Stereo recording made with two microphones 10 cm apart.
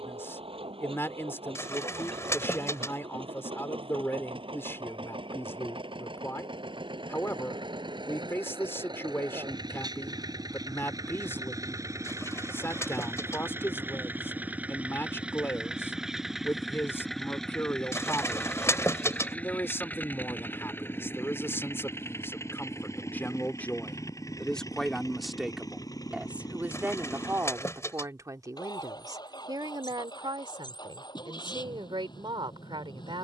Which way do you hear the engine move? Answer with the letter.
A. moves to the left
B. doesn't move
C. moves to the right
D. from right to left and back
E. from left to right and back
A.